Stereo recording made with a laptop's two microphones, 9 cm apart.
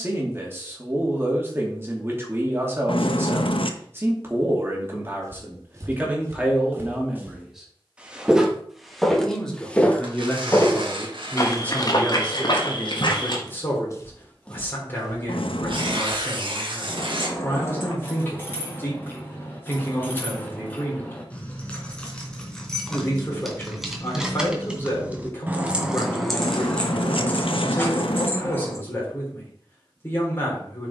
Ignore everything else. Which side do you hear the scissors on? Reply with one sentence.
You can hear the scissors on the left.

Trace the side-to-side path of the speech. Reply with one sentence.
In this clip you hear the speech move from right to left.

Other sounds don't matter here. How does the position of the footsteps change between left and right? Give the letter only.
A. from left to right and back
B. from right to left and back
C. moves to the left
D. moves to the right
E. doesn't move
B.